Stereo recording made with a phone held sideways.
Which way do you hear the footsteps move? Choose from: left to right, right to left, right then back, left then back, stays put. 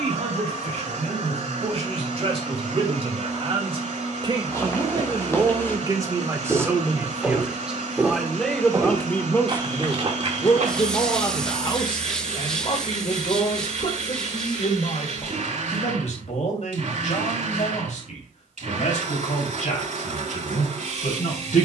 left to right.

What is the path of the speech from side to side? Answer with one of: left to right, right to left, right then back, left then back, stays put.
right to left.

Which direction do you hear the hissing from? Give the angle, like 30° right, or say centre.
10° left.